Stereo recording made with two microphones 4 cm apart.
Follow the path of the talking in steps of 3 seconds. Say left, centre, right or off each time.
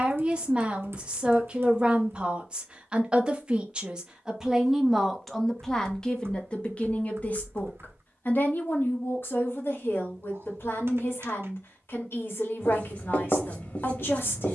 right, centre, left, left, left.